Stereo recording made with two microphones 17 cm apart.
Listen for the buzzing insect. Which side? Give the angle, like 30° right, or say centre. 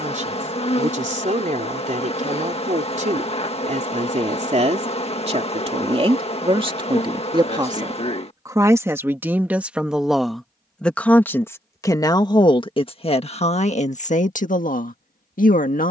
40° left.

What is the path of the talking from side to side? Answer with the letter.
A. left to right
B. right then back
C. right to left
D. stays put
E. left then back
C.